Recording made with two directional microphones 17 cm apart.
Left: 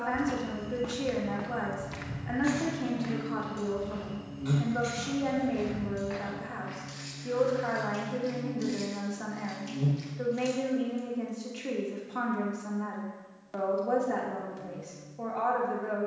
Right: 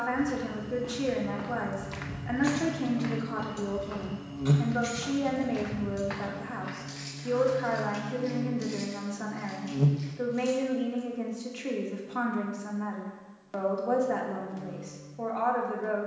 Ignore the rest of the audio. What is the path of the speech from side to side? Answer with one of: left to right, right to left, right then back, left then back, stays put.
stays put.